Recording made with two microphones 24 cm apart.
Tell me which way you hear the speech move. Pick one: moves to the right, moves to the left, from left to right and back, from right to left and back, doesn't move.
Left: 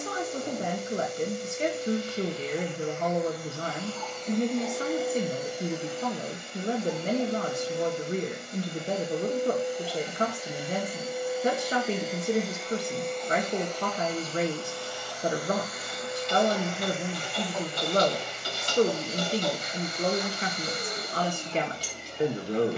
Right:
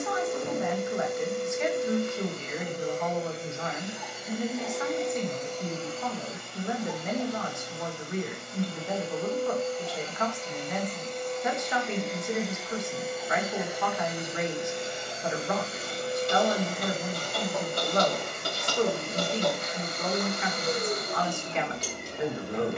doesn't move.